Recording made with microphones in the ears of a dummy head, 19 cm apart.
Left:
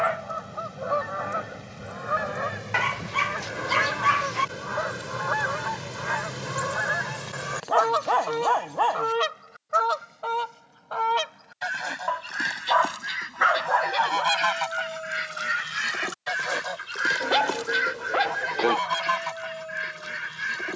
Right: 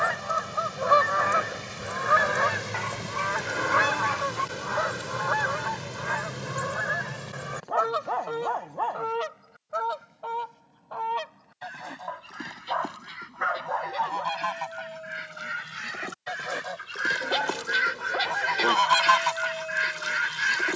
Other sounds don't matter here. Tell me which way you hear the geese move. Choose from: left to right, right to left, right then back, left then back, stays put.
left then back.